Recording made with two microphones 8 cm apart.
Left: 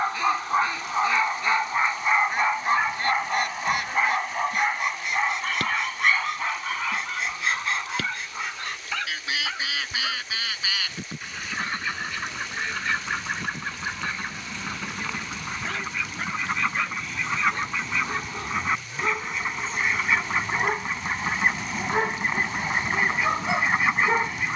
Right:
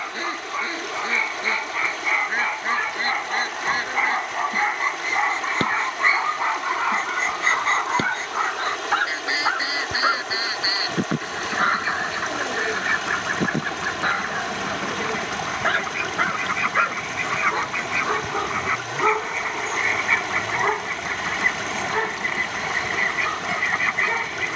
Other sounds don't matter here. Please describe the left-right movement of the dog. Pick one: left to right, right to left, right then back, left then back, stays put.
right then back.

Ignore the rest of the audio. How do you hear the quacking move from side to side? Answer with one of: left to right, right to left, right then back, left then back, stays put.
right to left.